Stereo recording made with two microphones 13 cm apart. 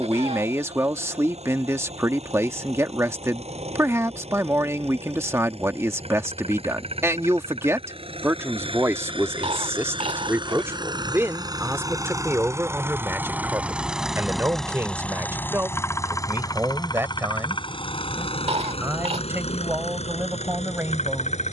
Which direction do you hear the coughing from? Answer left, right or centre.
right.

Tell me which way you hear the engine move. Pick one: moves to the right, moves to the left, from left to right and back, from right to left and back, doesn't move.
moves to the left.